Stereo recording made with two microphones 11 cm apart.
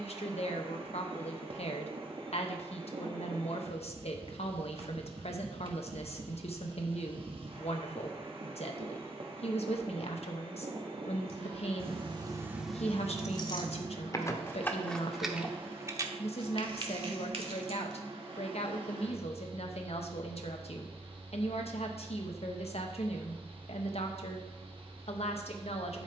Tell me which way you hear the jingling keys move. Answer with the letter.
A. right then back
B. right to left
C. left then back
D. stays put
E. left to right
C.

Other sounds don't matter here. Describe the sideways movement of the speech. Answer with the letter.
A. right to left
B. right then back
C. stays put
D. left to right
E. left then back
C.